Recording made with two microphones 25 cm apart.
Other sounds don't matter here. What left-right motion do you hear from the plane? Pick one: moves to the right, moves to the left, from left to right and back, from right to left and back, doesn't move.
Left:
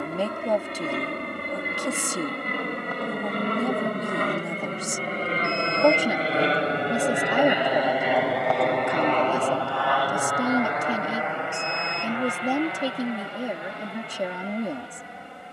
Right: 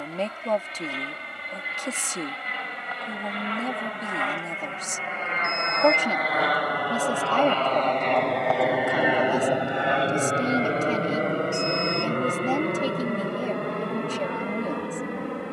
moves to the right.